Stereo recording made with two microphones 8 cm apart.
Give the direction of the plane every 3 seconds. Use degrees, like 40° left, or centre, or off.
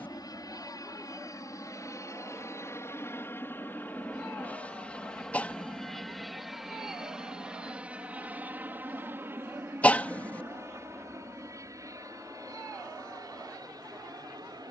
40° left, 20° left, 10° right, 30° right, 40° right.